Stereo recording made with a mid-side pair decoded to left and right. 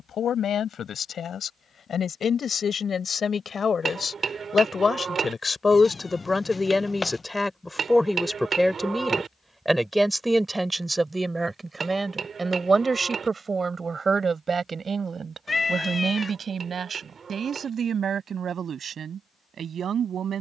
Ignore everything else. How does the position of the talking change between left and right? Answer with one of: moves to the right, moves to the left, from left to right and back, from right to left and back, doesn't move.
moves to the right.